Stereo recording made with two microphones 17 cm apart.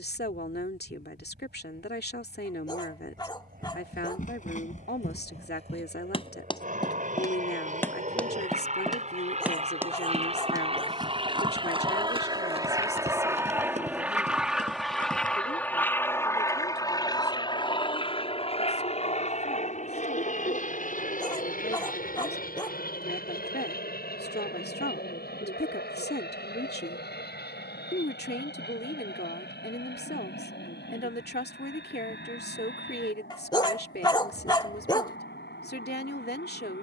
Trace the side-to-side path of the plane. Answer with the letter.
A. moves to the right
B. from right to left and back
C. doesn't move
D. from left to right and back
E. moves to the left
E.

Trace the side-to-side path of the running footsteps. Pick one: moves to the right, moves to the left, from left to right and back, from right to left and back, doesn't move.
moves to the right.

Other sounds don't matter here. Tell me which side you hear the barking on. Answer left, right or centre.
left.